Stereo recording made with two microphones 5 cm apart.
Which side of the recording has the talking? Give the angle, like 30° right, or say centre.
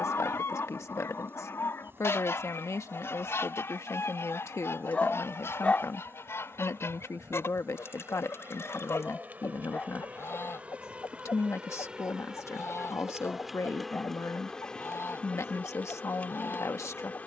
70° left.